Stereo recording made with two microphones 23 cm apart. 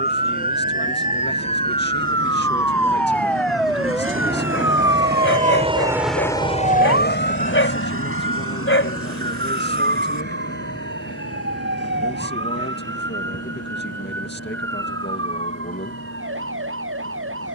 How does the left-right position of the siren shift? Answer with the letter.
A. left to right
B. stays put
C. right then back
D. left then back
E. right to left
A.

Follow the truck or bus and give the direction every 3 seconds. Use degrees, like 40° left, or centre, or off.
80° right, 50° right, 50° left, 80° left, 80° left, 80° left.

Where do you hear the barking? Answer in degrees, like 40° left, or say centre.
60° left.